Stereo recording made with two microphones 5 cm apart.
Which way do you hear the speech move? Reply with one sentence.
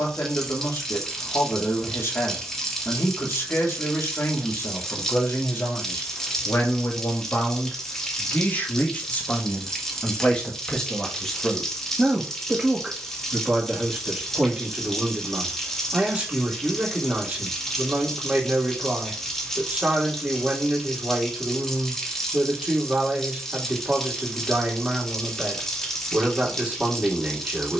In this clip you hear the speech move from left to right.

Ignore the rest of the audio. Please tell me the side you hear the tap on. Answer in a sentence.
In this clip you hear the tap in the centre.